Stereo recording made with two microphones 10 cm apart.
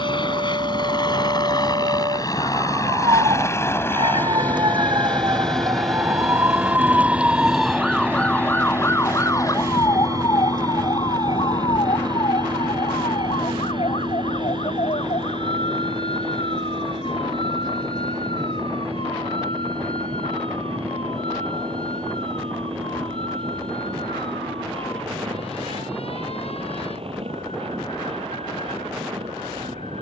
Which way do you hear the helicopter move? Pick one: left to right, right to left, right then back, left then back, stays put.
left to right.